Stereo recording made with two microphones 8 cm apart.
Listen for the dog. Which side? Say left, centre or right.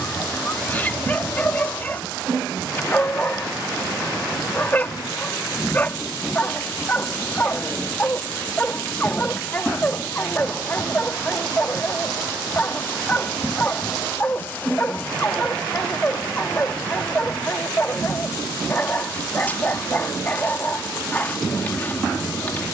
left.